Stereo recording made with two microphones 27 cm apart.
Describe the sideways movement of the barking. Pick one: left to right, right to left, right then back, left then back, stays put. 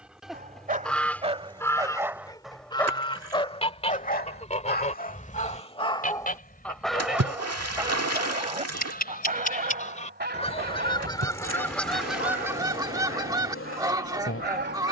left then back.